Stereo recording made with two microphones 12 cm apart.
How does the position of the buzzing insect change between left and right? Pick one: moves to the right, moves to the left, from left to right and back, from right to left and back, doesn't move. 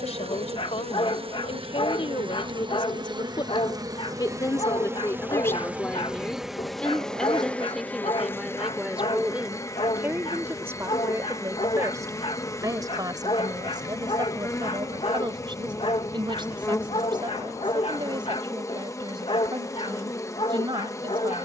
moves to the left.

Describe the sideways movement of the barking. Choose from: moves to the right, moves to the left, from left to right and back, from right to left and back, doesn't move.
doesn't move.